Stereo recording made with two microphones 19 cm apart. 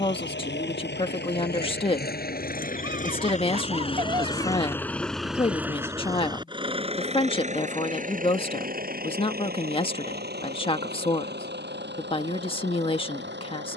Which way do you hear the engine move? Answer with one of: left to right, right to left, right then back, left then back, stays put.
left to right.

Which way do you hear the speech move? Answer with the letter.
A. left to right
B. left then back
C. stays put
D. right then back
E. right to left
C.